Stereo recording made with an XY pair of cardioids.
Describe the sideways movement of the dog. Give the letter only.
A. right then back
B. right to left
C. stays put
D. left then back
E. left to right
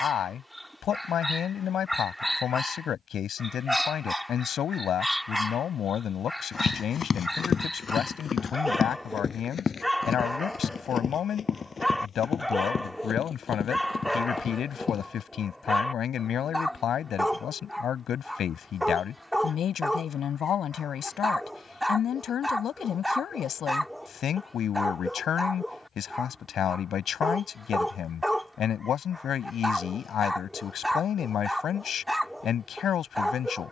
C.